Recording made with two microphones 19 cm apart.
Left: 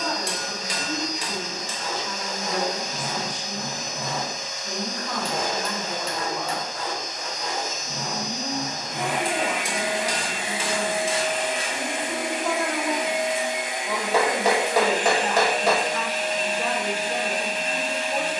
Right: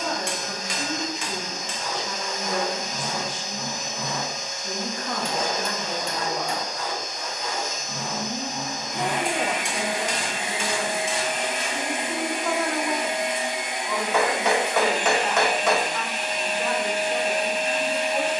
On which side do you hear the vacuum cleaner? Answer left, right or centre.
left.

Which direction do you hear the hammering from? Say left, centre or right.
left.